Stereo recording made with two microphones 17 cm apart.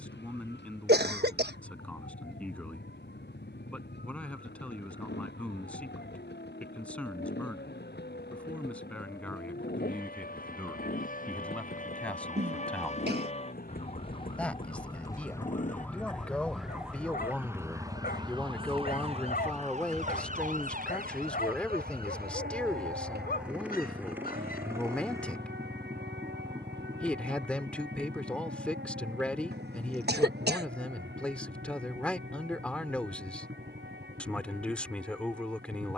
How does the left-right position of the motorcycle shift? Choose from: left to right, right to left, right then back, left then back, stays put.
left to right.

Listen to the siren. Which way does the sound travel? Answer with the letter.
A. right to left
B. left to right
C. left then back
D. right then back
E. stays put
B.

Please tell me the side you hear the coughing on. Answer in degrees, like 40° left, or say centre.
70° right.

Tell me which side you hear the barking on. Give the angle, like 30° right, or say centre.
60° left.